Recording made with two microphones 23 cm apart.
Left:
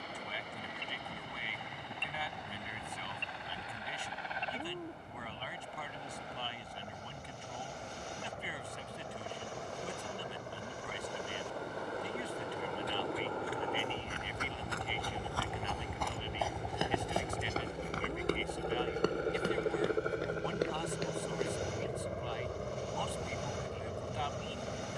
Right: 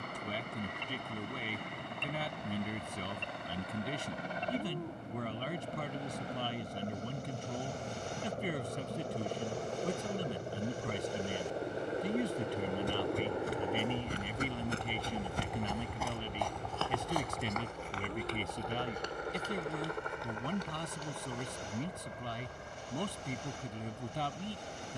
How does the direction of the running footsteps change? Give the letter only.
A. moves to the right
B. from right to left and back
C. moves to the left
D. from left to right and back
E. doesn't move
C.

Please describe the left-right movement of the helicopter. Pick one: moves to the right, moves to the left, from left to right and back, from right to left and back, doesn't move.
moves to the left.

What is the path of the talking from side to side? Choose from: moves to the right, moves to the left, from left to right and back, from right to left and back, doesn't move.
doesn't move.